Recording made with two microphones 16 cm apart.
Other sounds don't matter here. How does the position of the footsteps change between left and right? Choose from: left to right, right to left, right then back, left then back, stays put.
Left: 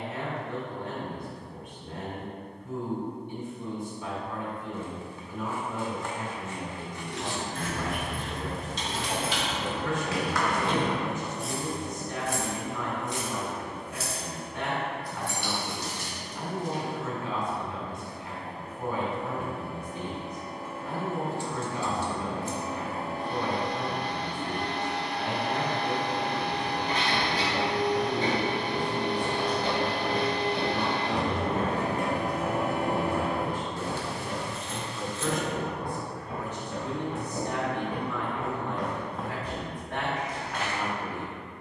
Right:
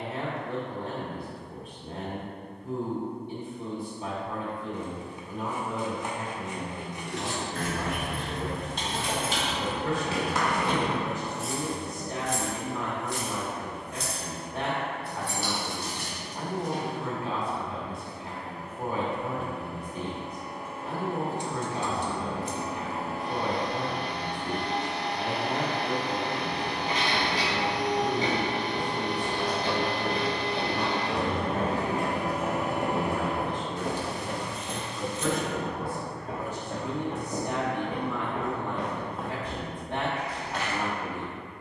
right then back.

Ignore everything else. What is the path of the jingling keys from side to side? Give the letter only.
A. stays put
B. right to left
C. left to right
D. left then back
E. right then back
D.